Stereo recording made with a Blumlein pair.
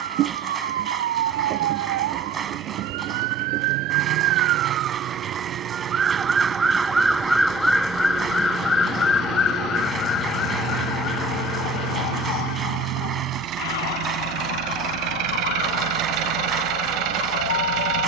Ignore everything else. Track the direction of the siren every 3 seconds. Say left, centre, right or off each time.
right, right, centre, left, left, left.